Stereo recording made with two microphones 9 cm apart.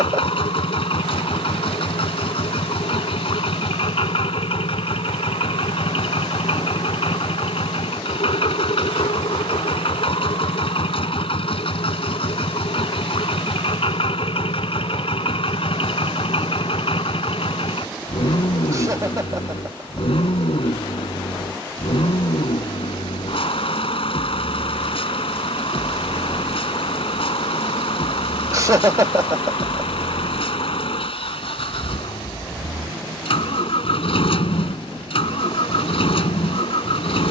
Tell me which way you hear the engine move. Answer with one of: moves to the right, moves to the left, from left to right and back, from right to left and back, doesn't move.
doesn't move.